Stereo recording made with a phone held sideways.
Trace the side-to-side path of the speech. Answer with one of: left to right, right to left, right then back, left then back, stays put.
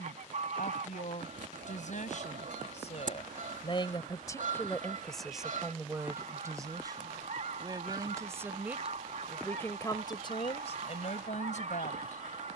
right then back.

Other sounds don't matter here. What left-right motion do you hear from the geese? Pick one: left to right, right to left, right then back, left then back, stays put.
stays put.